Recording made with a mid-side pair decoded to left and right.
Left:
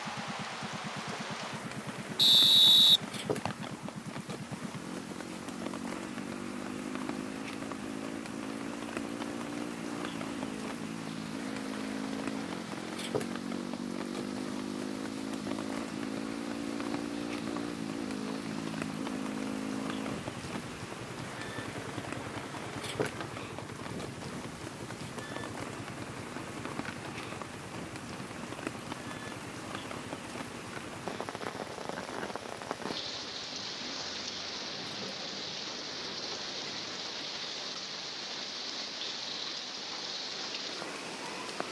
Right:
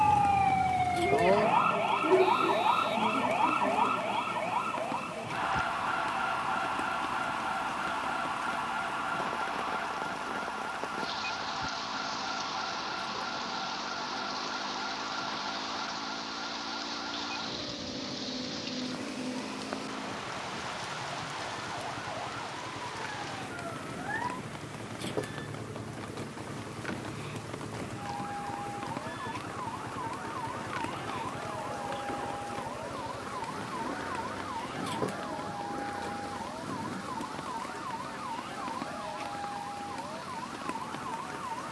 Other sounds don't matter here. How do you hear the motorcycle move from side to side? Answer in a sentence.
You can hear the motorcycle move from left to right.